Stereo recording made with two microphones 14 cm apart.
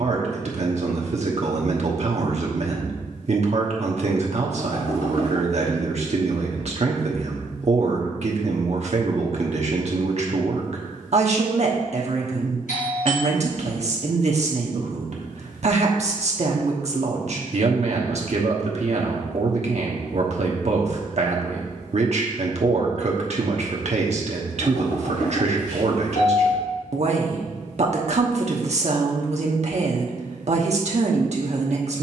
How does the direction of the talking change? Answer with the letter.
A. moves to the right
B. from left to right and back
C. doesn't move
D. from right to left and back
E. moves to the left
C.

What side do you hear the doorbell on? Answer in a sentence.
In this clip you hear the doorbell on the left.